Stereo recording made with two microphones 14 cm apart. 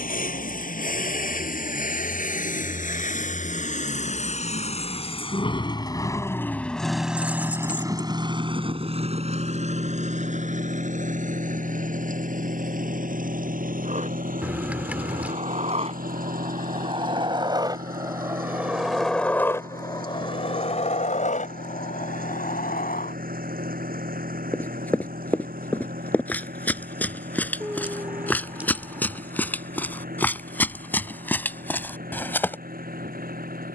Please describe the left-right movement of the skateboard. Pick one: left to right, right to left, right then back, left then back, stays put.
right to left.